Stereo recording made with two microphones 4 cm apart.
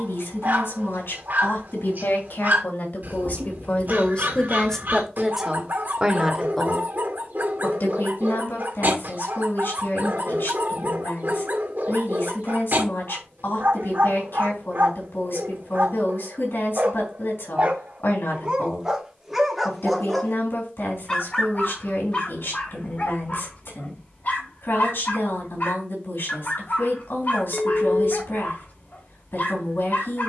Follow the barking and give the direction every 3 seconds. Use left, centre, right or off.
right, right, right, right, right, right, centre, left, left, left.